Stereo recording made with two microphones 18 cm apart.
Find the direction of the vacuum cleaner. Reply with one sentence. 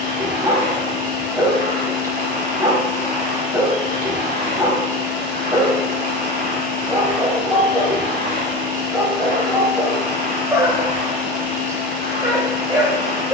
You can hear the vacuum cleaner on the right.